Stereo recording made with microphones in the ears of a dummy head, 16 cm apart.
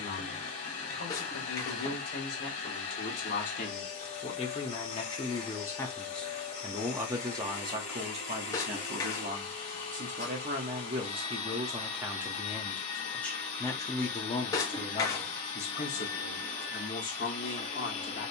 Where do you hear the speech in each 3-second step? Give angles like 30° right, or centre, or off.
50° left, 30° left, 20° right, 30° right, 10° left, 40° left.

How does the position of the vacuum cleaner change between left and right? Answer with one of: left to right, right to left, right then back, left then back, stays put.
stays put.